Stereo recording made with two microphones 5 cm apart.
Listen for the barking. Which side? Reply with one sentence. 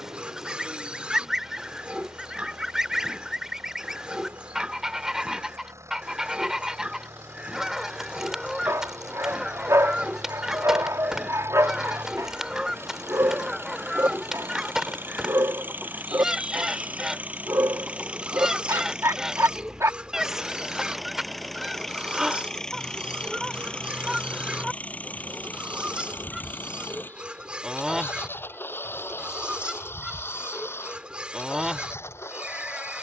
You can hear the barking on the right.